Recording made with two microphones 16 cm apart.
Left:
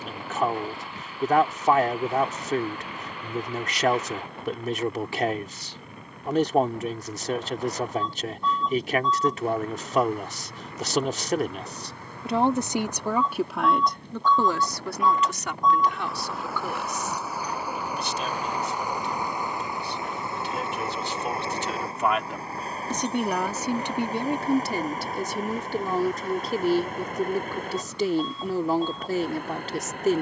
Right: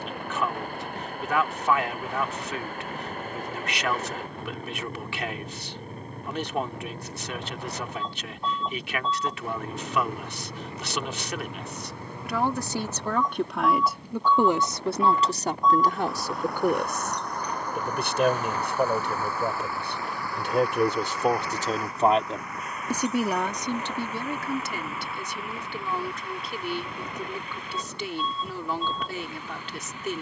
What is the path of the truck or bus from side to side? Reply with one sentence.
You can hear the truck or bus move to the left.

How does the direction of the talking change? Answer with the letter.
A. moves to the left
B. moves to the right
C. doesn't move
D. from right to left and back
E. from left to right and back
E.